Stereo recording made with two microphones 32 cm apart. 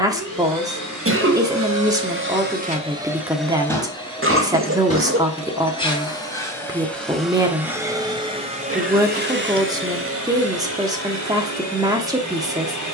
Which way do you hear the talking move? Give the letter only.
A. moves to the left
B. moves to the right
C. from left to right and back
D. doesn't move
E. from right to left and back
D.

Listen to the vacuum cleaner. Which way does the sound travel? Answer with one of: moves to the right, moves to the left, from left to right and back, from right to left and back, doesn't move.
from right to left and back.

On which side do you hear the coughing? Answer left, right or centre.
right.